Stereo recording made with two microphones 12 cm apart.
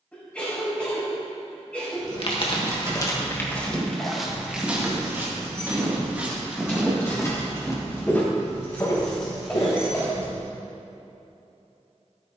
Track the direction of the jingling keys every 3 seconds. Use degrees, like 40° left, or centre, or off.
30° right, centre, 20° left, 10° right.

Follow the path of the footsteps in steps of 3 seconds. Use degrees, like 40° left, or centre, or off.
40° left, centre, centre, 40° left.